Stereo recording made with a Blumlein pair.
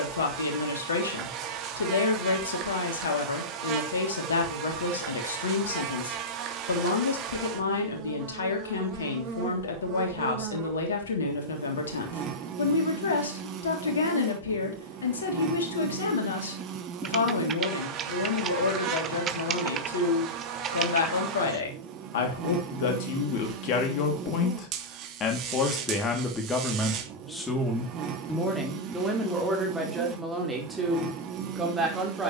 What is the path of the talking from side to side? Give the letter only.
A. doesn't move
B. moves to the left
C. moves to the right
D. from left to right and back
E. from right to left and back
C.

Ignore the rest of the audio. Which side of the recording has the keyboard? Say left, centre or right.
right.